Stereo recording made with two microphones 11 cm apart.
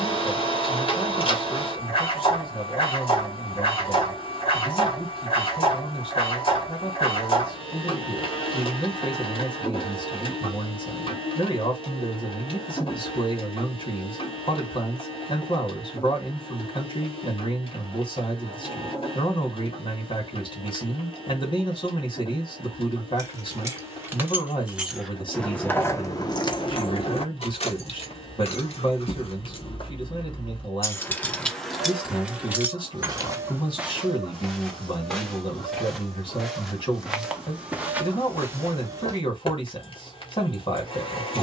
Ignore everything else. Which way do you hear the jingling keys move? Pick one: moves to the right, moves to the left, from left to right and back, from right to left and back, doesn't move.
from right to left and back.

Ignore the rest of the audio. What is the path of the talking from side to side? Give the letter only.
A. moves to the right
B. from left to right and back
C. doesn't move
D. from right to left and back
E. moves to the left
C.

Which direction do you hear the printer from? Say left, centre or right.
left.